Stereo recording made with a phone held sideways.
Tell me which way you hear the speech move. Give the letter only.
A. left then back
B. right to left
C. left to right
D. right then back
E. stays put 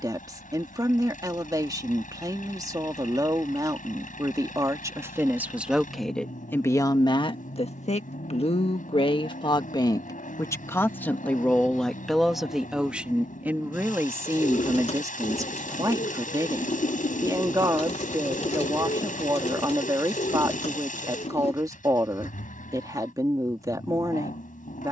A.